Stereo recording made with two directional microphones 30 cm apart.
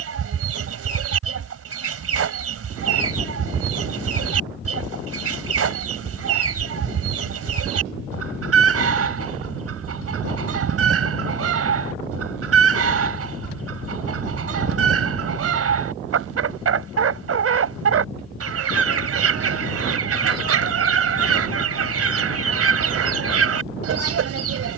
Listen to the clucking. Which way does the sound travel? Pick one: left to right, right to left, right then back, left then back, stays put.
stays put.